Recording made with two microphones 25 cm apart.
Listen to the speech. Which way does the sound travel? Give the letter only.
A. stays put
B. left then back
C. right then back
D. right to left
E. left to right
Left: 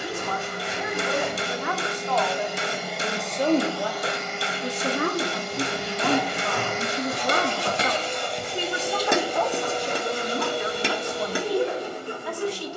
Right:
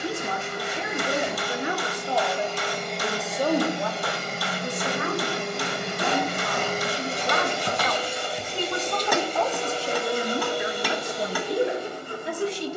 B.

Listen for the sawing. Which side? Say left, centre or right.
left.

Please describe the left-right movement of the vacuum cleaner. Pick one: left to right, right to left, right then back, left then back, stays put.
right then back.